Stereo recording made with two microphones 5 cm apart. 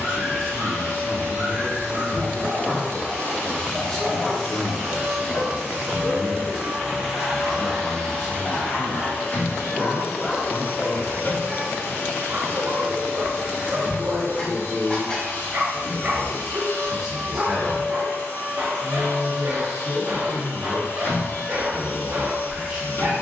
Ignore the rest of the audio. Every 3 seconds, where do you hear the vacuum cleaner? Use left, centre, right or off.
left, centre, centre, left, left, left, left, left.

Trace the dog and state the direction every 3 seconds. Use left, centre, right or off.
right, centre, left, centre, right, right, right, right.